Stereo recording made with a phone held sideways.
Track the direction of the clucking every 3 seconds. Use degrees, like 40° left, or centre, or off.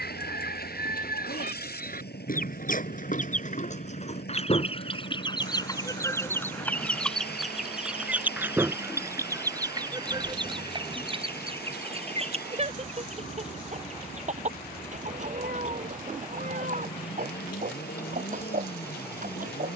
70° left, 40° left, centre, 30° right, 40° right, 50° right, 50° right.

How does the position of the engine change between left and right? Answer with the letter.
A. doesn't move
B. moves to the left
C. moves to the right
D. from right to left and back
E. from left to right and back
A.